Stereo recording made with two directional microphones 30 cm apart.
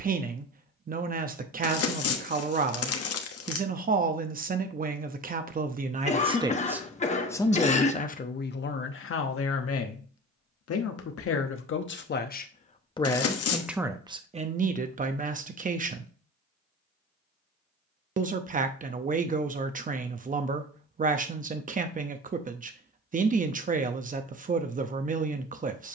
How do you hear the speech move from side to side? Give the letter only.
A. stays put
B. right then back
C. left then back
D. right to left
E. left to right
C.